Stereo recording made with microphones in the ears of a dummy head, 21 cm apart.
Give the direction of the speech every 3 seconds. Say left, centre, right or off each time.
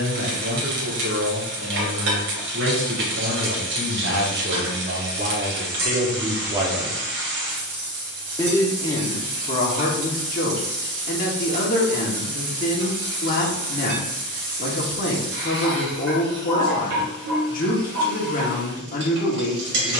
right, right, centre, left, left, left, left.